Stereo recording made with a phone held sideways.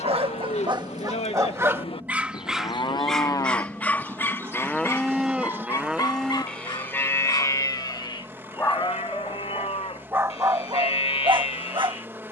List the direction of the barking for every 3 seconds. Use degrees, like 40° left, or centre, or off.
20° right, 10° left, 20° left, 20° right.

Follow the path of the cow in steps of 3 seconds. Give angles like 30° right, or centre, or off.
40° left, 10° left, 20° left, 40° left.